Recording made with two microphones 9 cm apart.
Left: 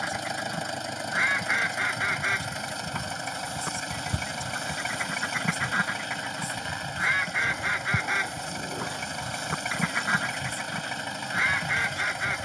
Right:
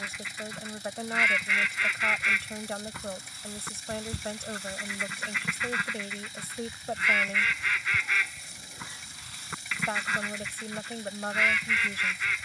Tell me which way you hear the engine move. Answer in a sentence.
You can hear the engine stay in one place.